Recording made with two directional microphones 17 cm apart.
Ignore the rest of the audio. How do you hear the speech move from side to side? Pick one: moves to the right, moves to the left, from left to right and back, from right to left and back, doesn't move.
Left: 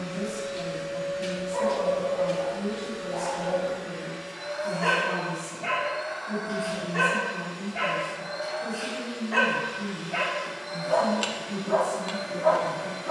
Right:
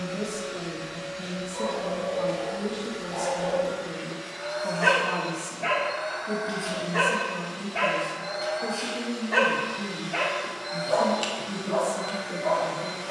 doesn't move.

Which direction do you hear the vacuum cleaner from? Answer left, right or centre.
right.